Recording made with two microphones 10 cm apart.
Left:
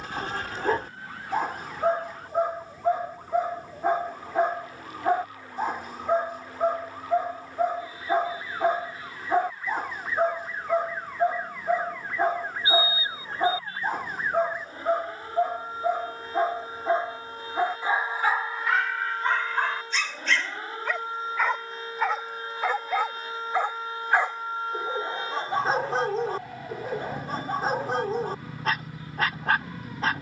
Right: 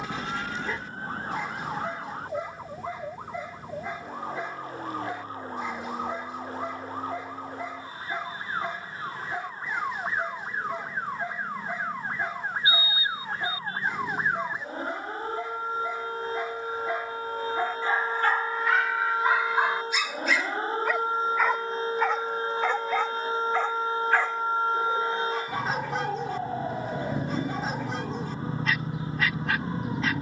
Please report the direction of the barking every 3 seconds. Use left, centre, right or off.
left, left, left, left, left, left, centre, centre, left, left.